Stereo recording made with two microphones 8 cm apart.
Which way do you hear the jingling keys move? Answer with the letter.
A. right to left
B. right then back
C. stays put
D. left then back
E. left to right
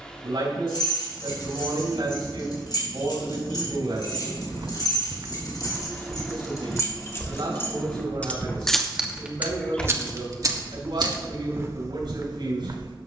E.